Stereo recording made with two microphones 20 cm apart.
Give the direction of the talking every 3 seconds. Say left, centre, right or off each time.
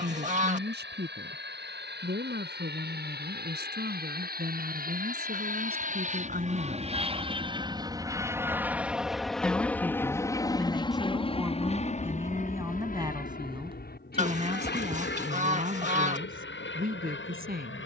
right, right, right, centre, right, right.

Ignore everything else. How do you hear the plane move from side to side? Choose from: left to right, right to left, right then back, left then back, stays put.
right to left.